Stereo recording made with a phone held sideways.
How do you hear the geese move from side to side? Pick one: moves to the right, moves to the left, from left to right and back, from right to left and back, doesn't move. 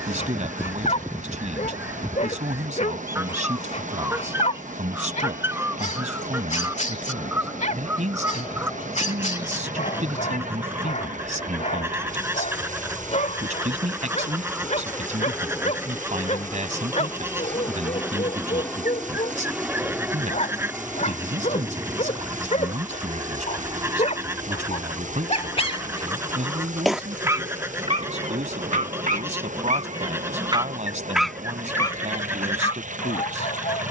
doesn't move.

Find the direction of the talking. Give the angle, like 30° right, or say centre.
60° right.